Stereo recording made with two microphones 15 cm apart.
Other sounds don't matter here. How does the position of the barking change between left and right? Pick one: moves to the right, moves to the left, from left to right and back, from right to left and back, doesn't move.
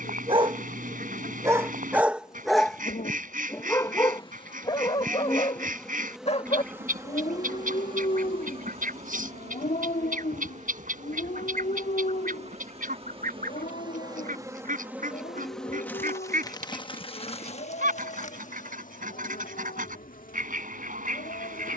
moves to the left.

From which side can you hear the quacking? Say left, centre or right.
right.